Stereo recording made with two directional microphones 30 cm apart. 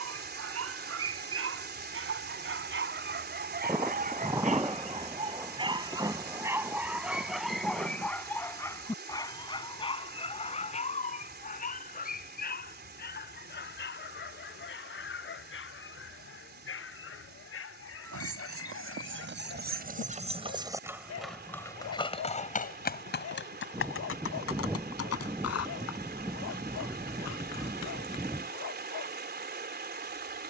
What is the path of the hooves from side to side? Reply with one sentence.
You can hear the hooves travel towards the left.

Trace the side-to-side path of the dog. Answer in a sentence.
In this clip you hear the dog move to the left.